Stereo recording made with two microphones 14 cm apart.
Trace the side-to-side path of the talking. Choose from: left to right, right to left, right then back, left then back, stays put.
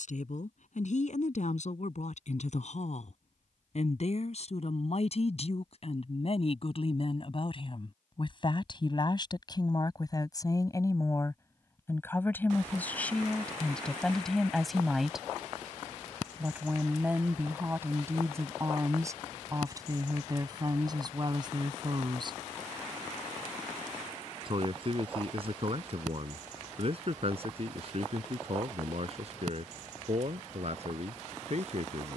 left to right.